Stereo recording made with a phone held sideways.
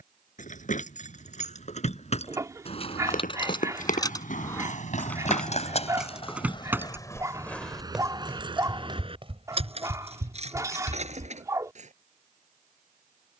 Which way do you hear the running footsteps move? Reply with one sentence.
In this clip you hear the running footsteps move to the right.